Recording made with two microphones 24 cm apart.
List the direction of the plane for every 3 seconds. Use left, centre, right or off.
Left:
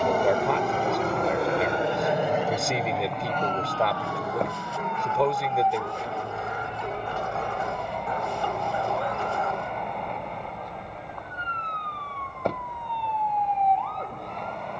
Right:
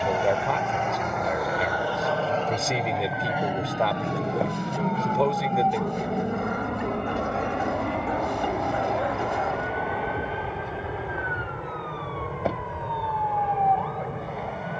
left, right, right, right, right.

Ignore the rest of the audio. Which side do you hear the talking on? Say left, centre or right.
centre.